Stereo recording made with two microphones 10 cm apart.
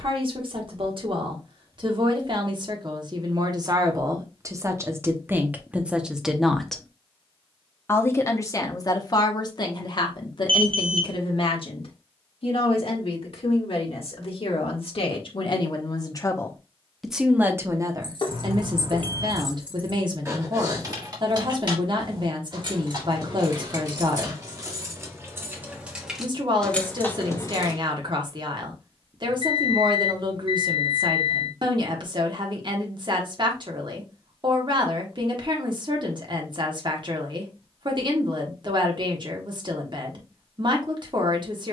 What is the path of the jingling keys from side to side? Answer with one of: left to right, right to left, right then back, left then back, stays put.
right then back.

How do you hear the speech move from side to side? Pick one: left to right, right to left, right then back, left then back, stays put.
left then back.